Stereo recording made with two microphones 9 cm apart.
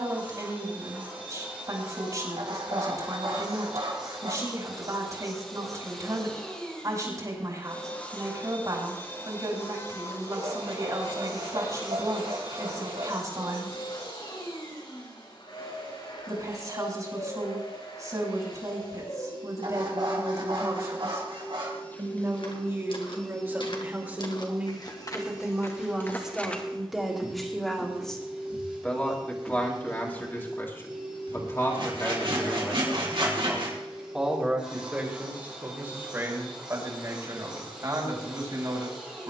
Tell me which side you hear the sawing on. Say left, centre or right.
right.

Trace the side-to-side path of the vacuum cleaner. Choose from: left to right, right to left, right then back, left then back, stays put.
left then back.